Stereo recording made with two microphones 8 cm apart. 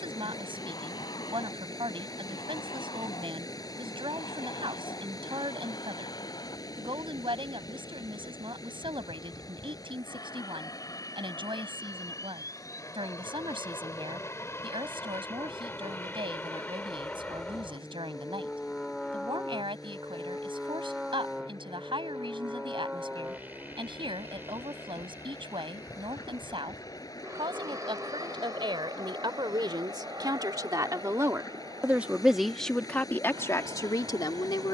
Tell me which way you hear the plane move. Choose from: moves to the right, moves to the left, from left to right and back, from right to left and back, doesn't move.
moves to the right.